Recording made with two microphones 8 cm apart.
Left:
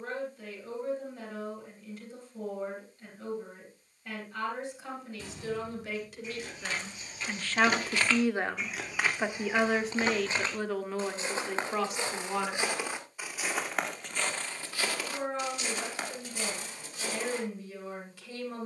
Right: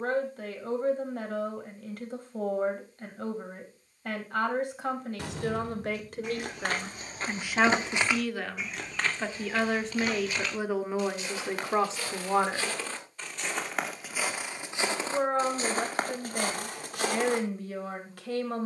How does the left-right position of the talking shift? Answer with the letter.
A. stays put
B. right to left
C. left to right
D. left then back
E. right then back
D.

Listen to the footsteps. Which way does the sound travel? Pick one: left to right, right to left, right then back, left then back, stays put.
left then back.